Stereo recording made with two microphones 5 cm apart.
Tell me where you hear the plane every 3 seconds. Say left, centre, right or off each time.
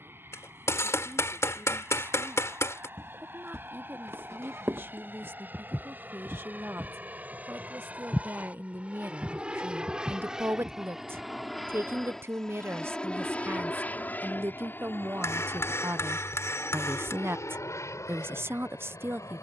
right, right, right, centre, left, left, left.